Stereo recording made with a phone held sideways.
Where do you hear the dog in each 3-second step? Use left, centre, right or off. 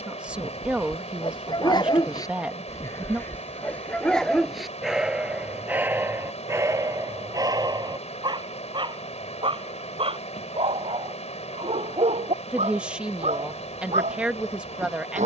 left, centre, right, right, right.